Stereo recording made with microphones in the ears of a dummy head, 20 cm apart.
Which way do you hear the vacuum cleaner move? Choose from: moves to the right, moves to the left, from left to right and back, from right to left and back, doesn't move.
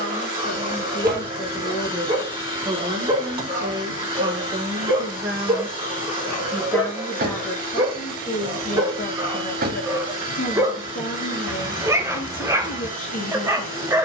doesn't move.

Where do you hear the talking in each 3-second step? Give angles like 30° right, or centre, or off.
20° left, 20° right, 20° left, 30° left, 40° left.